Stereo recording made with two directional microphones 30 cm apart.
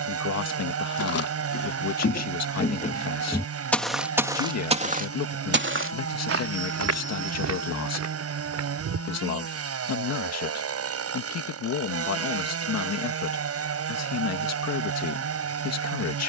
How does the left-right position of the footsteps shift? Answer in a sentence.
In this clip you hear the footsteps travel towards the right.